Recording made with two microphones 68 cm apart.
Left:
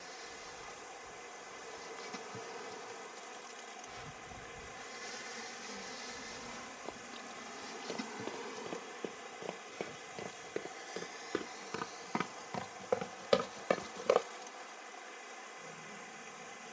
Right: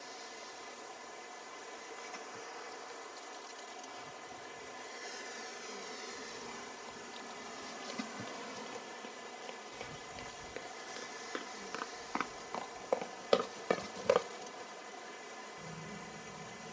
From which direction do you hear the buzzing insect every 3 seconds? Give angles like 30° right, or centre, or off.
70° left, 40° left, centre, 40° right, 50° right, 60° right.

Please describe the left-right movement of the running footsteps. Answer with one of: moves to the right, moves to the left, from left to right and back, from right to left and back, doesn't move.
moves to the right.